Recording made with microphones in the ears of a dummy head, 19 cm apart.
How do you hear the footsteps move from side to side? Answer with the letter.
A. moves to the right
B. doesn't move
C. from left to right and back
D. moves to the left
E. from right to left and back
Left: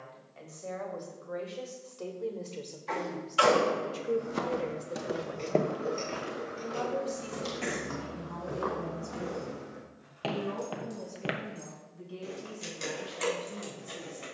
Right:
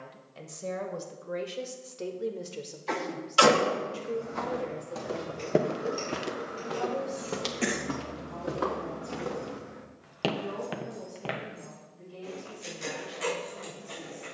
C.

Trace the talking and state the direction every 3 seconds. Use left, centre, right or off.
right, left, left, left, left.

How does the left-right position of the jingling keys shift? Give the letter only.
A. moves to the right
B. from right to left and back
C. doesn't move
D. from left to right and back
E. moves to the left
E.